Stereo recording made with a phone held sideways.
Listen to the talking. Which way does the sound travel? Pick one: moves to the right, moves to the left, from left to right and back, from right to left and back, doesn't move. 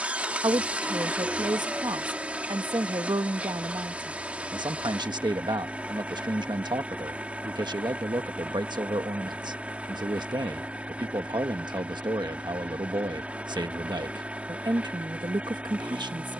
doesn't move.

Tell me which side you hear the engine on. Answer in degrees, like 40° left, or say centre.
10° right.